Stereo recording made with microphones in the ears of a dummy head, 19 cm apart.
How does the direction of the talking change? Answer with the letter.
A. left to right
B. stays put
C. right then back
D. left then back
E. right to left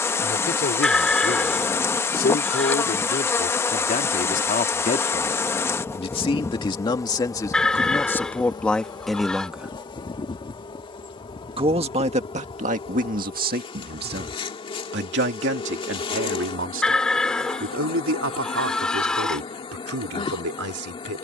A.